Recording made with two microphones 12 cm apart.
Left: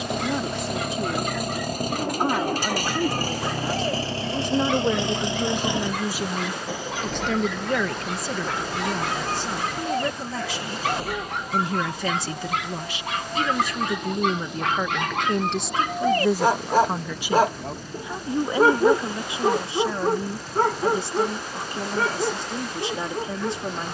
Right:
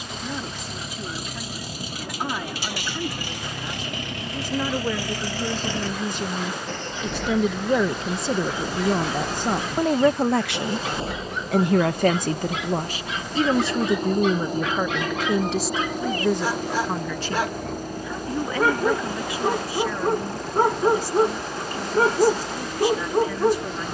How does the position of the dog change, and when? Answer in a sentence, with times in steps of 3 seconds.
In this clip you hear the dog on the left from 0 s, in the centre from 18 s and on the right from 21 s.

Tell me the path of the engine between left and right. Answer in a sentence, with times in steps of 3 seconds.
You can hear the engine on the left from 0 s, in the centre from 6 s and on the right from 9 s.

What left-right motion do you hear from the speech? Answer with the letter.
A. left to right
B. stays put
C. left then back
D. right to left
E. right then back
E.